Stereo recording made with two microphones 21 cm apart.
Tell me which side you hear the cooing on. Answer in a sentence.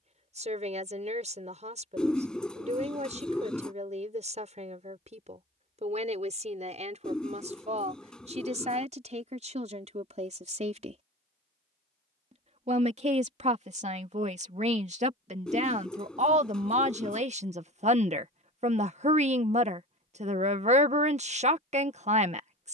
In this clip you hear the cooing in the centre.